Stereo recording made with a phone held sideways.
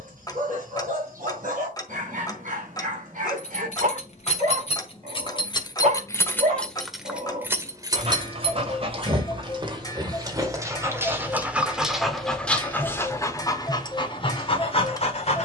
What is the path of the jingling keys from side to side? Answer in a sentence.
In this clip you hear the jingling keys go from the left side to the right.